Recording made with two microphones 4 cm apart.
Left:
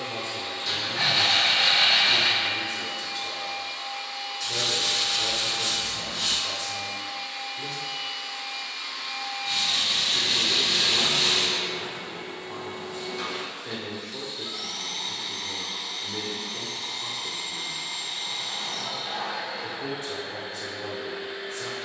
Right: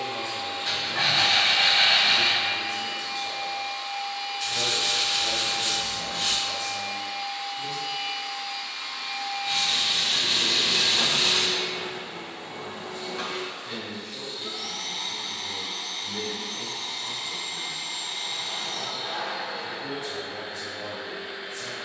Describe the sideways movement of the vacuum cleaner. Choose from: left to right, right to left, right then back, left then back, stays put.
stays put.